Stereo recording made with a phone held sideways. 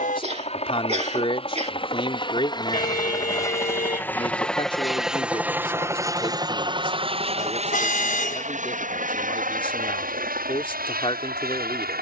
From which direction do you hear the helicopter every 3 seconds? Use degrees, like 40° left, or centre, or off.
40° left, centre, 40° right, 60° right.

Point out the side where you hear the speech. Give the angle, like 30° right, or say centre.
40° left.